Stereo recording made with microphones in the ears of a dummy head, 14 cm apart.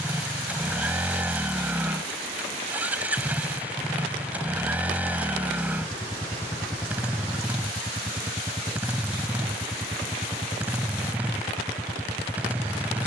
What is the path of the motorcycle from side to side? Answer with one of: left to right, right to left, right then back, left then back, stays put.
stays put.